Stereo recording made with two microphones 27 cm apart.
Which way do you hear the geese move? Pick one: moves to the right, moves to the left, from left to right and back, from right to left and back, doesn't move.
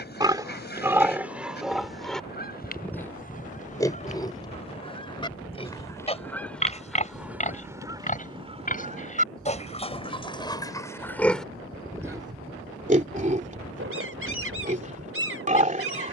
moves to the right.